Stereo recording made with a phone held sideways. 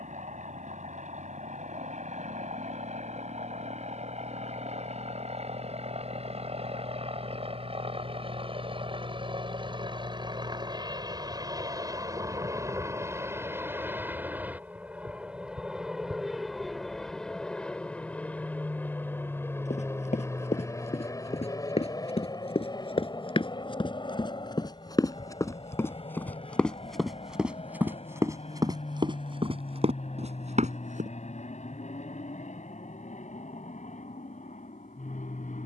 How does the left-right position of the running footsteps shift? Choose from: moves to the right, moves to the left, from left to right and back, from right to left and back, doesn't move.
moves to the right.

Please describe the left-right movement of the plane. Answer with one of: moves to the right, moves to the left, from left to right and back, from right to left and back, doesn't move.
moves to the left.